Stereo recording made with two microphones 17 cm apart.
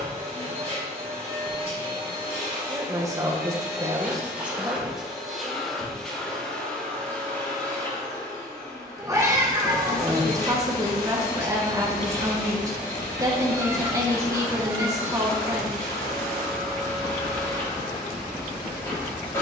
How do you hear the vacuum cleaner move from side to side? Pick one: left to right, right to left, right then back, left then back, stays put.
right to left.